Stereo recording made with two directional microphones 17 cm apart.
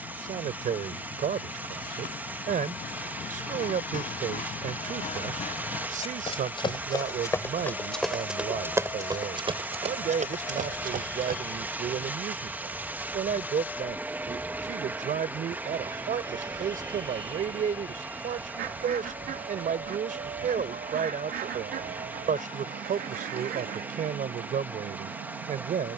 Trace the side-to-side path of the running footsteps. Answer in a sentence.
You can hear the running footsteps travel towards the right.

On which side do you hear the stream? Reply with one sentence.
You can hear the stream in the centre.